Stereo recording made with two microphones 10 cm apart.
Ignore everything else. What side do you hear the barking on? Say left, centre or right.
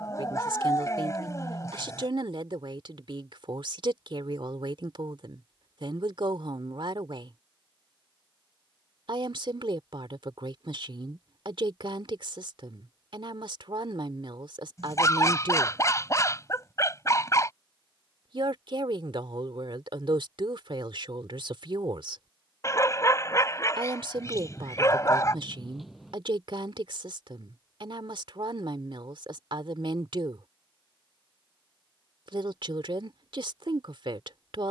left.